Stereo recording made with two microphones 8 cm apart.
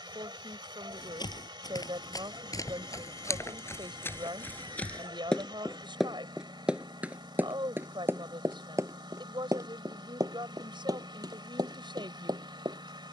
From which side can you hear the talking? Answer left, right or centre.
right.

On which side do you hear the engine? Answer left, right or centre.
right.